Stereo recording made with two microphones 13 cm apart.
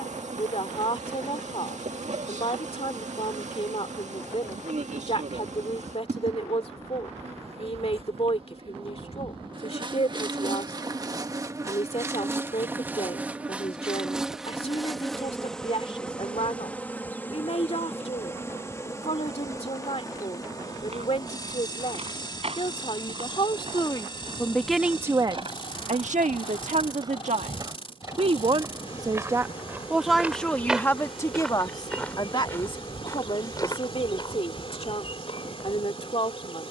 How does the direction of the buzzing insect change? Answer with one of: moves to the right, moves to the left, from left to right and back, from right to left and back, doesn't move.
moves to the left.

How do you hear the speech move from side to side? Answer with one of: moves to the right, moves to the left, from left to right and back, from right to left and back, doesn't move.
from left to right and back.